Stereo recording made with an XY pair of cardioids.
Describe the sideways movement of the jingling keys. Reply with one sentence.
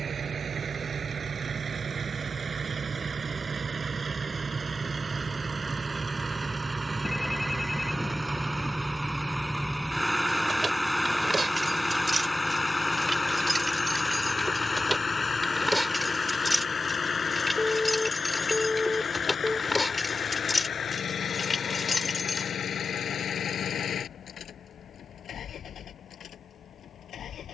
You can hear the jingling keys travel towards the left.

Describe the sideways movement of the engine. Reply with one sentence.
In this clip you hear the engine go from the right side to the left.